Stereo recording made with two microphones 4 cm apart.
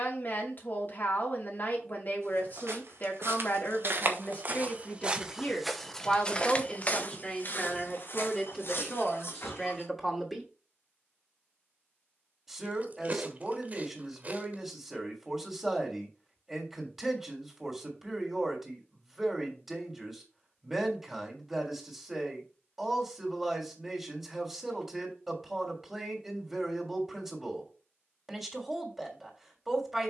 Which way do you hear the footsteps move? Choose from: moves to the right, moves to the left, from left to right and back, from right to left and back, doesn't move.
moves to the left.